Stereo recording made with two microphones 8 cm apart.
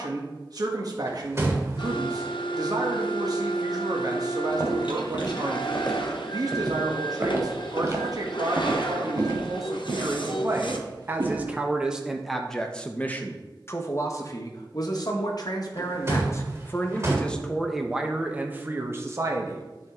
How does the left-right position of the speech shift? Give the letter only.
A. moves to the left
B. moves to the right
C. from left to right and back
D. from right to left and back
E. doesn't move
D.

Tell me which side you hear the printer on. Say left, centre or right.
left.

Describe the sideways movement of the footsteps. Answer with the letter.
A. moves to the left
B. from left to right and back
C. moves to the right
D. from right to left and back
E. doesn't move
C.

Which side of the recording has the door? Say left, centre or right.
right.